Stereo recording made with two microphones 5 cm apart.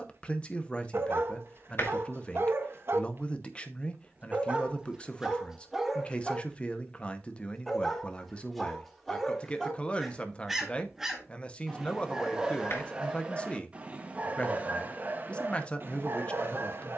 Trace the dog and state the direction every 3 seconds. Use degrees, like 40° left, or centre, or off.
50° right, 20° right, 10° left, centre, 20° right, 40° right.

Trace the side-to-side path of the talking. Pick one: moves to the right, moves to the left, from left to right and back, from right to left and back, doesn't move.
doesn't move.